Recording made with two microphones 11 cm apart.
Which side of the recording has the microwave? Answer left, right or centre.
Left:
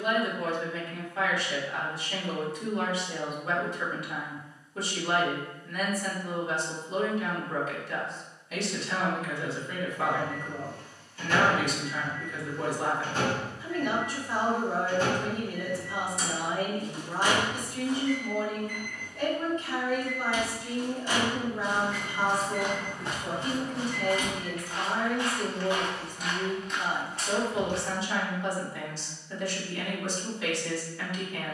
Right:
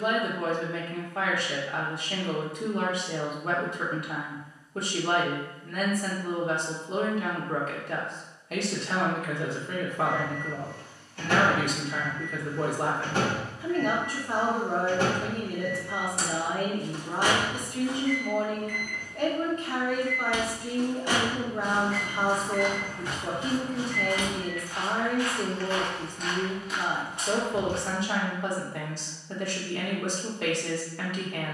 right.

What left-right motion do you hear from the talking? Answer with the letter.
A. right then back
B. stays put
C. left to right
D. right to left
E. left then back
B.